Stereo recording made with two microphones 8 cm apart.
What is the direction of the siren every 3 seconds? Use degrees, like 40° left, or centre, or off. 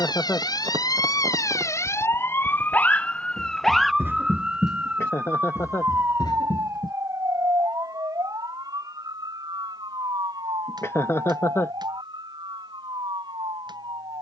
40° left, 10° right, 40° right, 50° right, 60° right.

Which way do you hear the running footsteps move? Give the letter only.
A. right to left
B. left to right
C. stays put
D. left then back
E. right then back
A.